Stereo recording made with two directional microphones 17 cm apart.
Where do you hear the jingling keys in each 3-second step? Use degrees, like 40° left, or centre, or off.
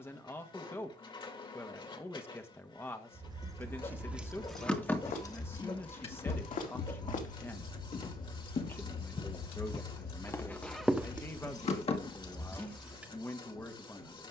off, centre, 50° left, 60° left, 10° left.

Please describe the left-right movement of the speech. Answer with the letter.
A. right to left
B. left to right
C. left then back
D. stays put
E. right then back
D.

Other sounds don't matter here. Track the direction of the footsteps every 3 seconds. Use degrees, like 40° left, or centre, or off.
off, 60° left, 50° left, 10° left, off.